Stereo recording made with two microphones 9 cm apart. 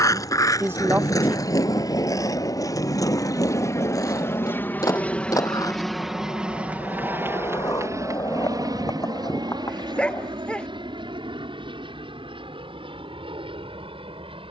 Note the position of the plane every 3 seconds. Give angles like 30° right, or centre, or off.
60° left, 30° left, 30° right, 60° right, 70° right.